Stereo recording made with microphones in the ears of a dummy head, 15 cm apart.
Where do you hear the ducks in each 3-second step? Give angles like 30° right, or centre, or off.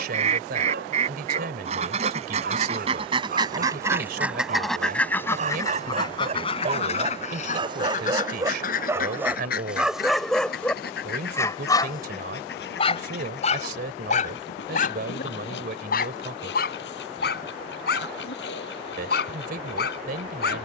40° right, centre, 40° left, 60° left, 70° left, 70° left, 70° left.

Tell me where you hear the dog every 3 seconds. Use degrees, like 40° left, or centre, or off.
60° right, 50° right, 30° right, centre, 40° left, 60° left, 70° left.